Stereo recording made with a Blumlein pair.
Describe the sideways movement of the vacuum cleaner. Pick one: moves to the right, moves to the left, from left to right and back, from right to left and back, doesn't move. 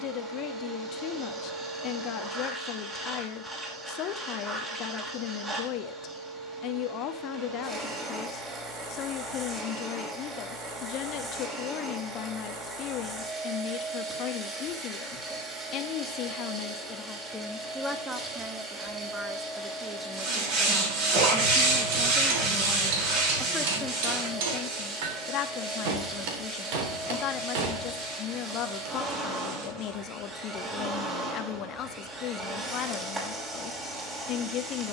doesn't move.